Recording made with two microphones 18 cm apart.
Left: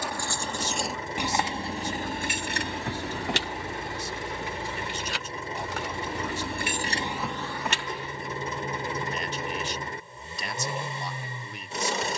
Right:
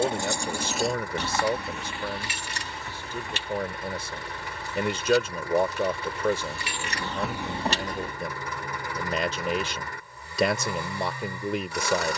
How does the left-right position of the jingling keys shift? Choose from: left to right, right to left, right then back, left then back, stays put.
left then back.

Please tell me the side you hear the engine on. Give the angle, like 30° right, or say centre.
20° left.